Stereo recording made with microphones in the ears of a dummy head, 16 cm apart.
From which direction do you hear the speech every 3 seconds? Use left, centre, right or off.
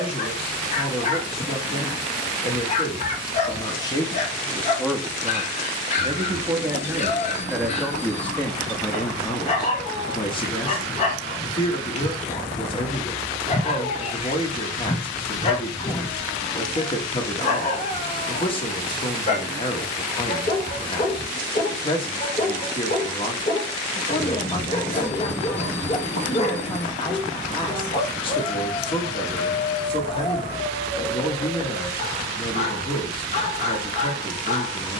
left, centre, centre, left, left, left, left, left, left, left, left, left.